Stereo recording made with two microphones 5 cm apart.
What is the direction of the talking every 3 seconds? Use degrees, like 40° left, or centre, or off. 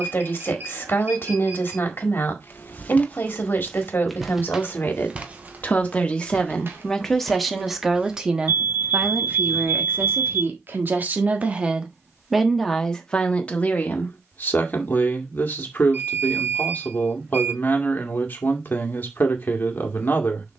40° left, 40° left, centre, 30° right, 20° left, 40° left, 40° left.